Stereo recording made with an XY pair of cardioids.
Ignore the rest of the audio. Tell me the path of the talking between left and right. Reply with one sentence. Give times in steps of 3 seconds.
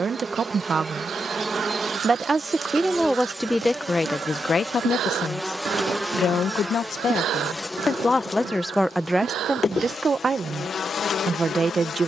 In this clip you hear the talking on the right from 0 s, on the left from 3 s and on the right from 9 s.